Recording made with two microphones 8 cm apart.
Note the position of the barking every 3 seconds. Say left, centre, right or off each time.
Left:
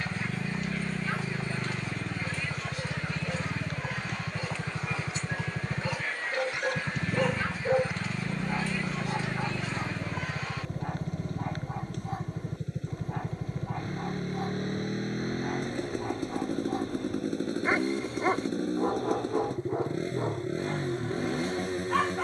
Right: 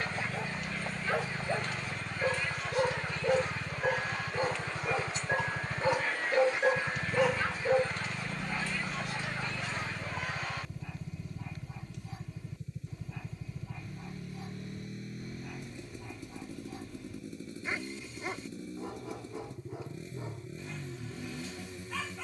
right, right, centre, left, left, left, left, left.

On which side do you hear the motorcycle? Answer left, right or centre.
left.